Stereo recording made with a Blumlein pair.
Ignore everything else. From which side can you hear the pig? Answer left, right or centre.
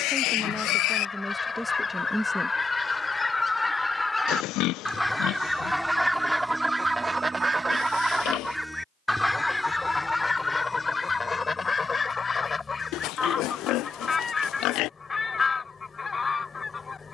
left.